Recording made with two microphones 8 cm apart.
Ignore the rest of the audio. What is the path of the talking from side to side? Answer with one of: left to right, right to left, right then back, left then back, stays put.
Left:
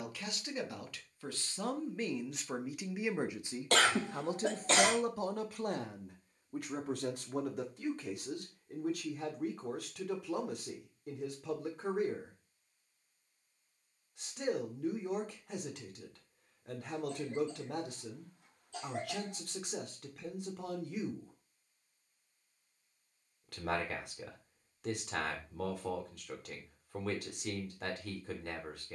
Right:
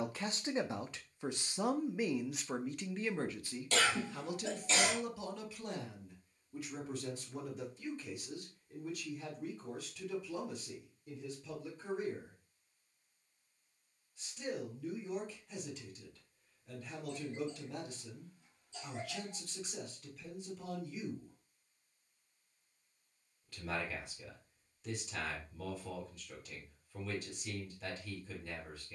right to left.